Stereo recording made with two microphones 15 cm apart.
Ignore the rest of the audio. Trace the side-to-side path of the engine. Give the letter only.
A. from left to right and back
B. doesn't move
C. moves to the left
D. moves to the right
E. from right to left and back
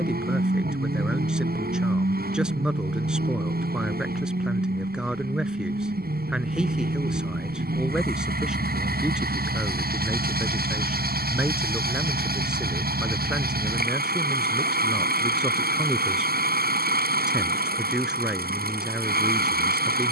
B.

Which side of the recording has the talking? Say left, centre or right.
centre.